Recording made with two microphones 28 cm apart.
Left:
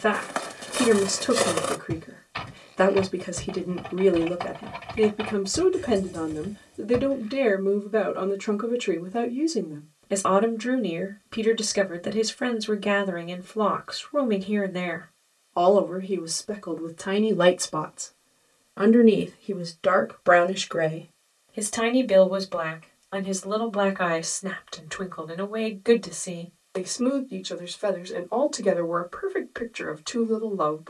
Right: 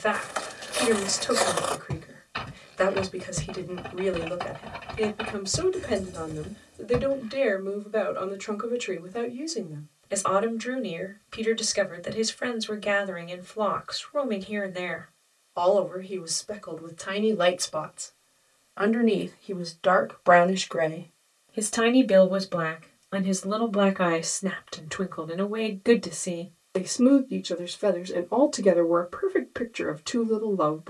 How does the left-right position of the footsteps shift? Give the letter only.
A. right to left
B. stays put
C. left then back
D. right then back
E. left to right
E.